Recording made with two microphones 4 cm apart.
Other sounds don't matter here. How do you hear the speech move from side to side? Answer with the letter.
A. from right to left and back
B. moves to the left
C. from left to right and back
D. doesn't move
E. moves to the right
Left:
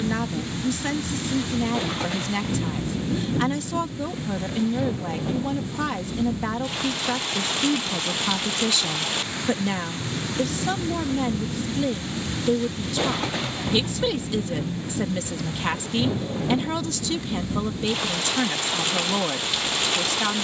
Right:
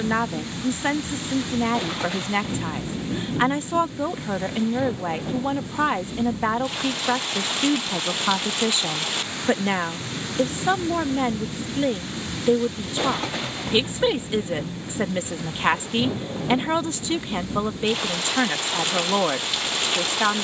D.